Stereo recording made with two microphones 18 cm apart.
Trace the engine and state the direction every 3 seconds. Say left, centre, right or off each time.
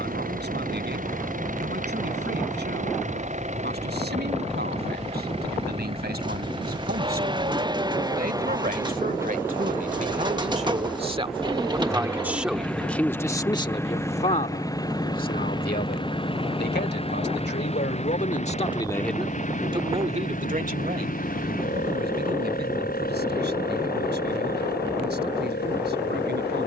right, right, right, centre, centre, left, left, left, left.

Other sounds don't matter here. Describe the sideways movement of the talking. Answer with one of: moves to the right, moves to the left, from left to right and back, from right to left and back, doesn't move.
from right to left and back.